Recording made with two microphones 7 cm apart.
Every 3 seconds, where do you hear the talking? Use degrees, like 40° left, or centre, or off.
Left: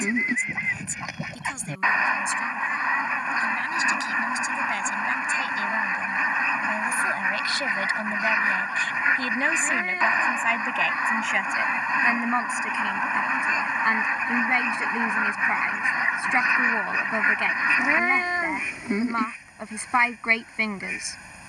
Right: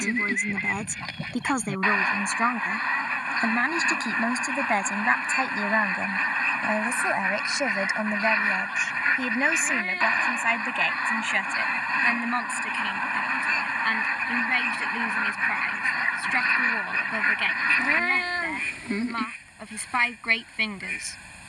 60° right, 40° right, 20° right, centre, 20° left, 20° left, 20° left.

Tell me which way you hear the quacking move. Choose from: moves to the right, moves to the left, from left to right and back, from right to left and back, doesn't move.
doesn't move.